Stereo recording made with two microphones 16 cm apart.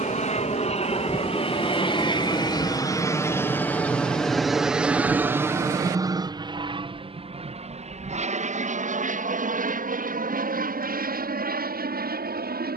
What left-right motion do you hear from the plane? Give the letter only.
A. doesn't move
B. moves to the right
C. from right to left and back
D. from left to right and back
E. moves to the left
B.